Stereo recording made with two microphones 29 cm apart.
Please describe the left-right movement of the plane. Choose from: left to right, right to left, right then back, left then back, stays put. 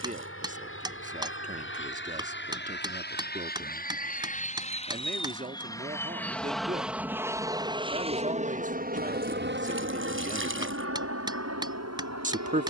left to right.